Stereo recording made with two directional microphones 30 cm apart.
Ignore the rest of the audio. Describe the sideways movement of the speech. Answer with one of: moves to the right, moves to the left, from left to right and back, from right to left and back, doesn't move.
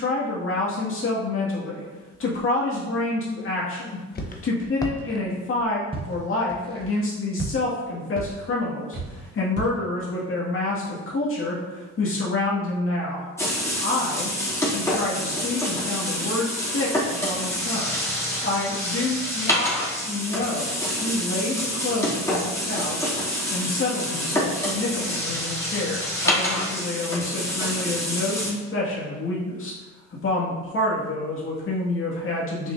doesn't move.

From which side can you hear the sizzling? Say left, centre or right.
centre.